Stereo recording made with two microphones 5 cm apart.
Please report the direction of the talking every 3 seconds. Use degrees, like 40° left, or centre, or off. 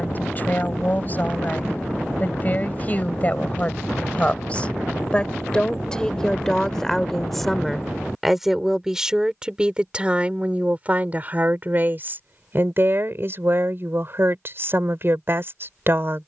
30° left, 30° left, centre, 20° right, 40° right, 50° right.